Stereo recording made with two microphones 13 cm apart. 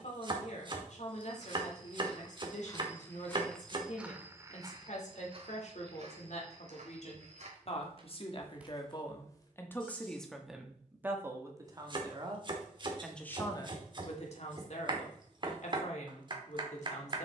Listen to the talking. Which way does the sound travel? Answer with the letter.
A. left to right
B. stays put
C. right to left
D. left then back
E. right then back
E.